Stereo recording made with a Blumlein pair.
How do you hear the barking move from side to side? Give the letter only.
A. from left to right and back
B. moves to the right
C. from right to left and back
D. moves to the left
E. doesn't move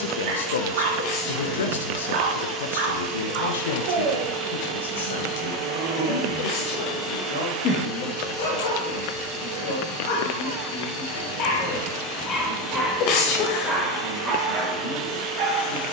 C.